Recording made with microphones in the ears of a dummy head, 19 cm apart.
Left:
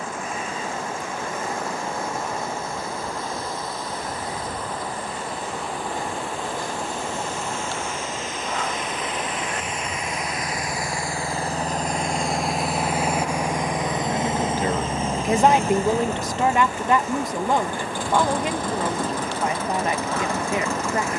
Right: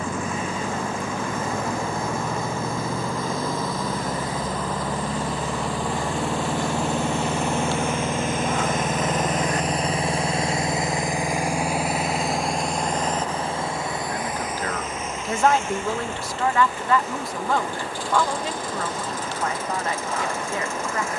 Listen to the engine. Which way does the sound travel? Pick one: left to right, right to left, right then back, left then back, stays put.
right to left.